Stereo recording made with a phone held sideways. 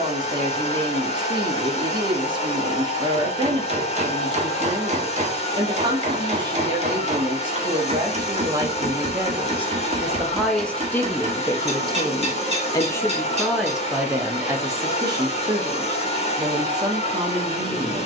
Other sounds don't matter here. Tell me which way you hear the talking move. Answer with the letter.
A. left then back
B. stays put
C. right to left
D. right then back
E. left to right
A.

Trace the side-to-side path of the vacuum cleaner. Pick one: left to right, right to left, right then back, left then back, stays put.
stays put.